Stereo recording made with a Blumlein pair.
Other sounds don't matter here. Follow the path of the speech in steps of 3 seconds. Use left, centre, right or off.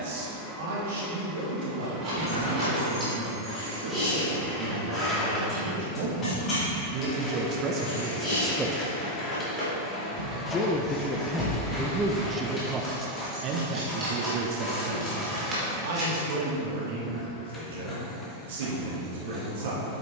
right, right, right, centre, right, right, right.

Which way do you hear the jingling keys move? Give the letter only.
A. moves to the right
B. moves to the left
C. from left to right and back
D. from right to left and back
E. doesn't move
D.